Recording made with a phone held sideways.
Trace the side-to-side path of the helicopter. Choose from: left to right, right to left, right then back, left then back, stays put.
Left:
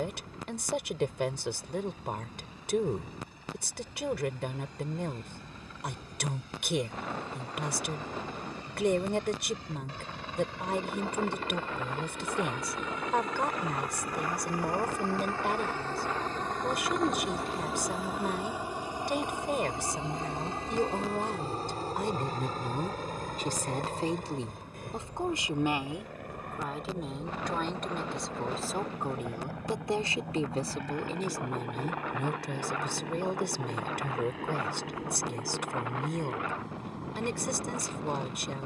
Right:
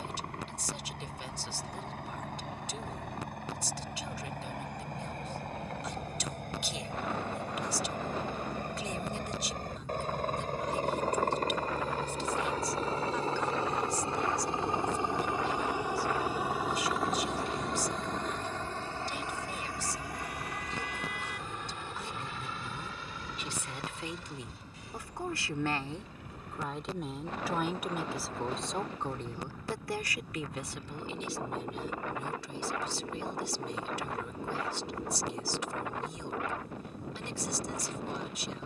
right to left.